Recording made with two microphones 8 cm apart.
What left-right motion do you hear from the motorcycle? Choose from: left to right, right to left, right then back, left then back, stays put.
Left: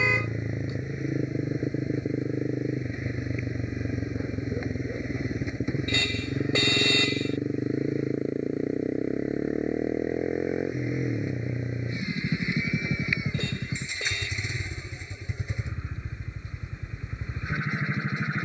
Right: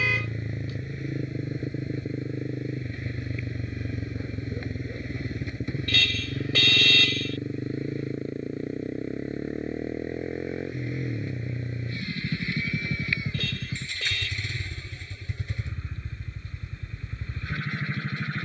stays put.